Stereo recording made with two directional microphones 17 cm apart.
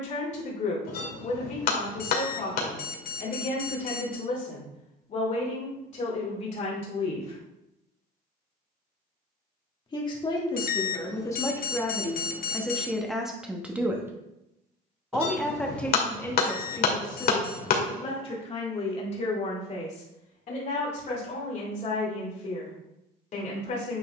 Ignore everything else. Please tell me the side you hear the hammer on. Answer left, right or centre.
left.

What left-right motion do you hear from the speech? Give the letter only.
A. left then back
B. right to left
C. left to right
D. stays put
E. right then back
E.